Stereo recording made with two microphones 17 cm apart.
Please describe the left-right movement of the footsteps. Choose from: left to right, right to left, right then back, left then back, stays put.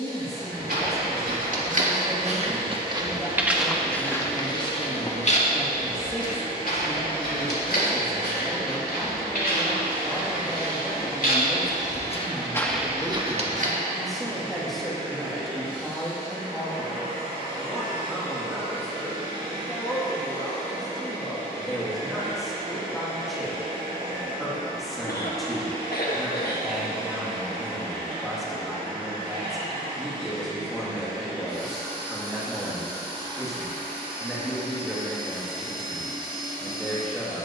left then back.